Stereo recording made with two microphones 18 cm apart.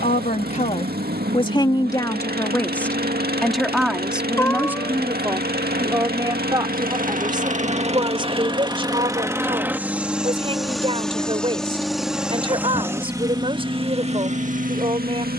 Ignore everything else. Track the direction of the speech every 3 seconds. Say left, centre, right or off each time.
left, centre, right, right, right.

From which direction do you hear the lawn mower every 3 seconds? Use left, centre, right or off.
right, right, right, centre, right.